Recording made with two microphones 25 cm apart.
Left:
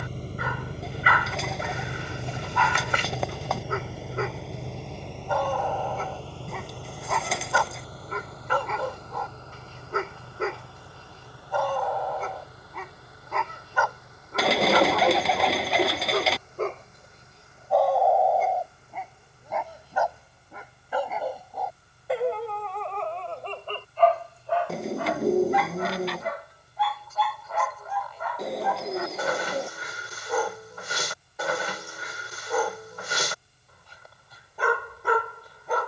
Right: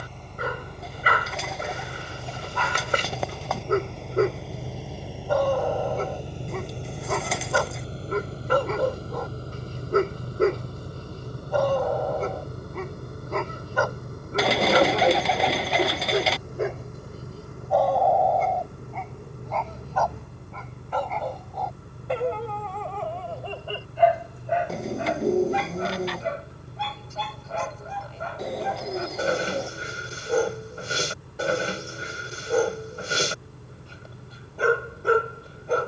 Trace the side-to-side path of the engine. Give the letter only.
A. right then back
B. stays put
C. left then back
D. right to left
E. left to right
E.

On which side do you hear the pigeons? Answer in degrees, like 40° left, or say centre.
centre.